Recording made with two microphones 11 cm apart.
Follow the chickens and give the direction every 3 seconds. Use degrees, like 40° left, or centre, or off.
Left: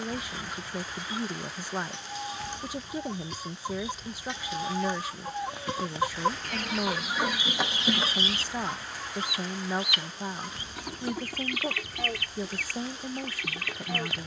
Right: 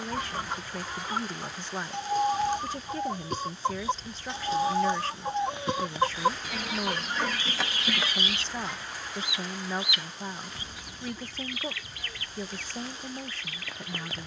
50° right, 30° right, 10° left, 60° left, 70° left.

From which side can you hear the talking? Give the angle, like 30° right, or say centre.
10° left.